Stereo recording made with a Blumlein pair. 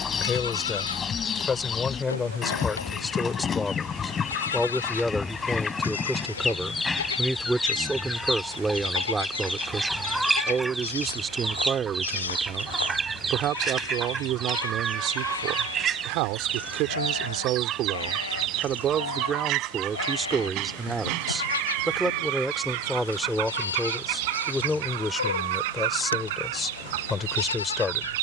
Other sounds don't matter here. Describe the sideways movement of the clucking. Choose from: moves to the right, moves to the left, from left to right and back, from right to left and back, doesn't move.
moves to the right.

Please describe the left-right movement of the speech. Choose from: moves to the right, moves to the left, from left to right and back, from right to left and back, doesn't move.
from left to right and back.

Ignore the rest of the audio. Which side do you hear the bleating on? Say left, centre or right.
left.